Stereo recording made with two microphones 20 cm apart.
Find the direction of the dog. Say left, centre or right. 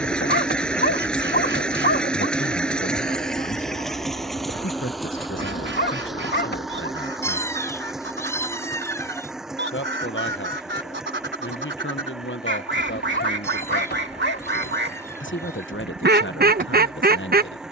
left.